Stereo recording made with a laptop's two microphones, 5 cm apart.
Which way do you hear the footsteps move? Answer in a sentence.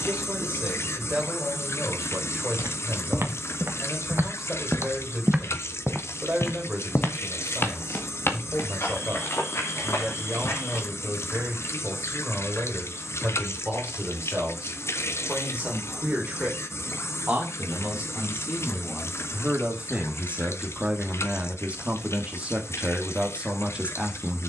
In this clip you hear the footsteps go from the right side to the left.